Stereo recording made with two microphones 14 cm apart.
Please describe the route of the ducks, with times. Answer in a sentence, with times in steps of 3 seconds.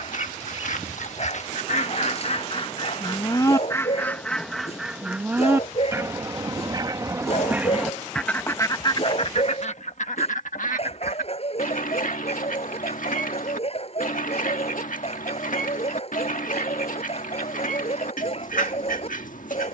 You can hear the ducks on the left from 0 s, in the centre from 3 s and on the left from 9 s.